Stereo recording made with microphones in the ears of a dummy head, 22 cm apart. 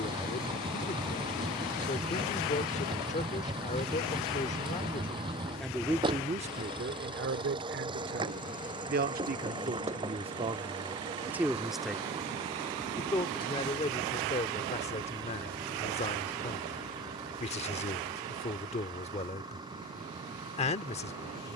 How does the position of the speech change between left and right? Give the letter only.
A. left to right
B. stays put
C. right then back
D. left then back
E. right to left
C.